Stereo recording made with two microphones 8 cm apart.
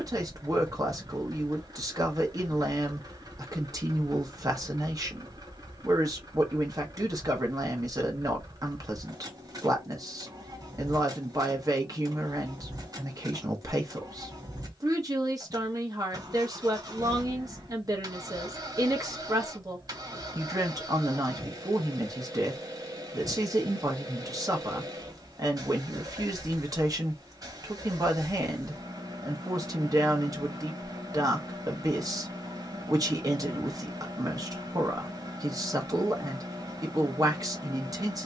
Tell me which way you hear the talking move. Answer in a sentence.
You can hear the talking stay put.